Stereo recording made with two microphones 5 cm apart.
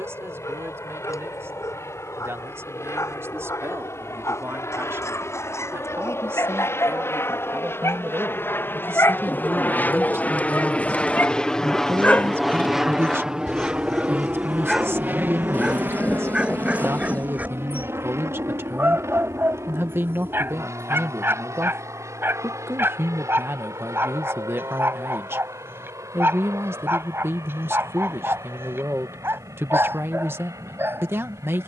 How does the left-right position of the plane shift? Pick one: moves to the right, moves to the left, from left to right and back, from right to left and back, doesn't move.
moves to the right.